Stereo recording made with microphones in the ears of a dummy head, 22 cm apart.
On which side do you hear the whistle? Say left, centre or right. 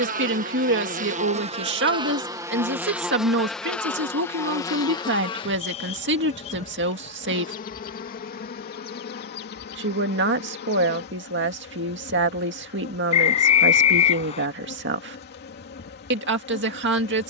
left.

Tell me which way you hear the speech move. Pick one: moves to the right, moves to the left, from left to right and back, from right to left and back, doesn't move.
doesn't move.